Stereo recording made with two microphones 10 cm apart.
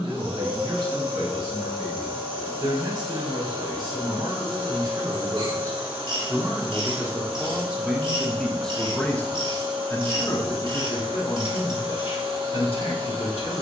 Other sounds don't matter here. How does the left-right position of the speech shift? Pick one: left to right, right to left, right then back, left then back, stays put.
right to left.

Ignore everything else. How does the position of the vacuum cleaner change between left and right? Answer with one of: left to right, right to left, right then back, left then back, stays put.
stays put.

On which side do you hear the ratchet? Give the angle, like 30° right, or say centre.
50° right.